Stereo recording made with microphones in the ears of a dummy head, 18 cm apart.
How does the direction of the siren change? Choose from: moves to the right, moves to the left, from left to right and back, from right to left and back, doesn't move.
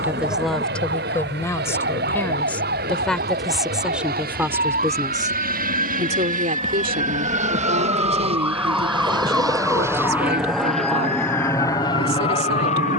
moves to the left.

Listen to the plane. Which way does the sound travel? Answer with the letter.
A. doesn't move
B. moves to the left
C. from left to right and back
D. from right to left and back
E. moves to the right
B.